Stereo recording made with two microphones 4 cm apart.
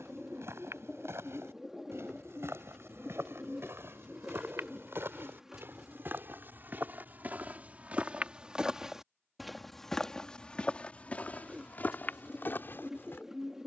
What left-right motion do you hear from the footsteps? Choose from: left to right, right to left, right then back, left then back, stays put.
right to left.